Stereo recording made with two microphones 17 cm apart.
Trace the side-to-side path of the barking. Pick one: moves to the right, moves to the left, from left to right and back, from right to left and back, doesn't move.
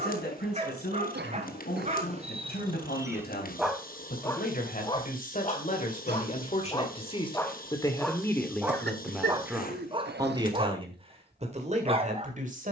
from right to left and back.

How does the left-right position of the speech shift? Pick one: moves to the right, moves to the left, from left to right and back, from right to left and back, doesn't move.
moves to the right.